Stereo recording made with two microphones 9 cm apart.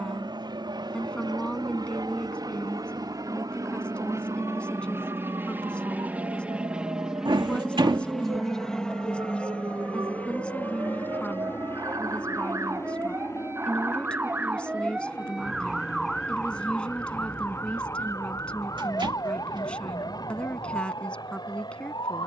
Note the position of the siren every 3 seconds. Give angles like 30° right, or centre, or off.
70° right, 60° right, 60° right, 50° right, 30° right, 10° left, 50° left, 70° left.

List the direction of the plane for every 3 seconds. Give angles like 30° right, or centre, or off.
60° right, 30° right, centre, 20° left, 30° left, 40° left, 50° left, 50° left.